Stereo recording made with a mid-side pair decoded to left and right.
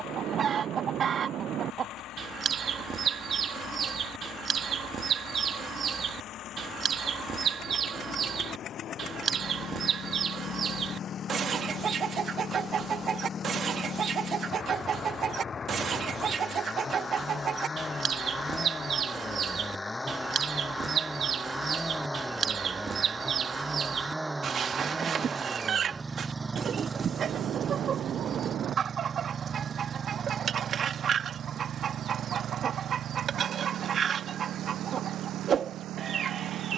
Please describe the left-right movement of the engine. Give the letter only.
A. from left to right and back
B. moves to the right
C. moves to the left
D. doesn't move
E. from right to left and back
B.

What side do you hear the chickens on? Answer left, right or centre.
right.